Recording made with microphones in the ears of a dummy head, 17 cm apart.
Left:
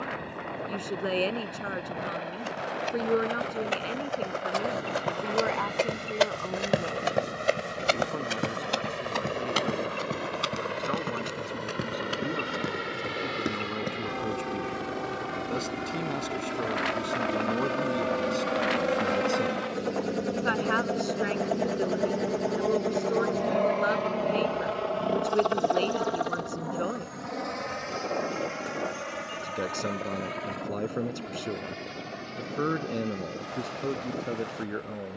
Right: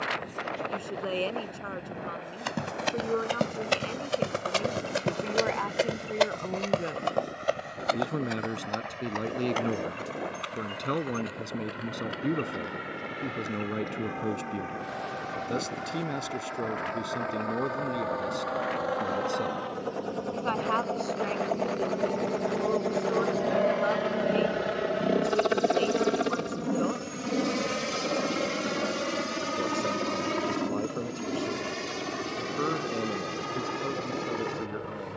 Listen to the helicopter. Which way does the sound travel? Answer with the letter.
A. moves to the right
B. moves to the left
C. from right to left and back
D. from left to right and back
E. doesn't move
A.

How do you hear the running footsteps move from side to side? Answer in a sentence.
You can hear the running footsteps travel towards the left.